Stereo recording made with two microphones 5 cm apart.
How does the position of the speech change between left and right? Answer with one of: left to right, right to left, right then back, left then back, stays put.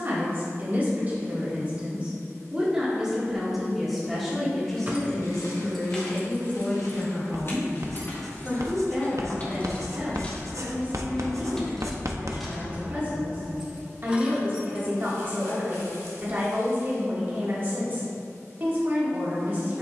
left then back.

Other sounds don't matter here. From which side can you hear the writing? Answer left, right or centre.
right.